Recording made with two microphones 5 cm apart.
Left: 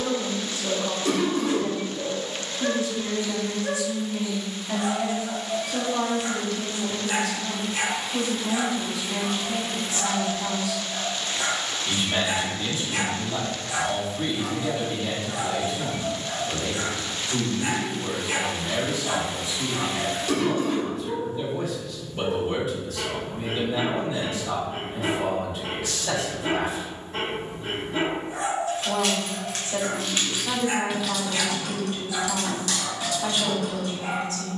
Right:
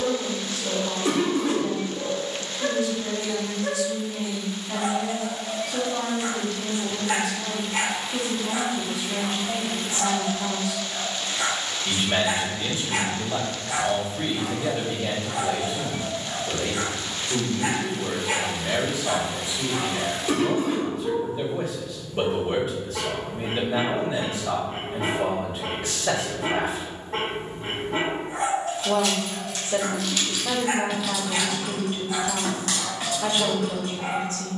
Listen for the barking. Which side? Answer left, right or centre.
right.